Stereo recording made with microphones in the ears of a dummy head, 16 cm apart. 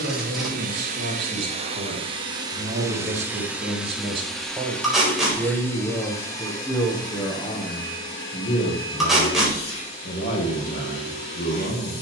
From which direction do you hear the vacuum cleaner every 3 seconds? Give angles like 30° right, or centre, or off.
40° right, centre, 30° left, 30° left.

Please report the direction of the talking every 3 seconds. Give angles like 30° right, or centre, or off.
50° right, 20° right, 20° left, 50° left.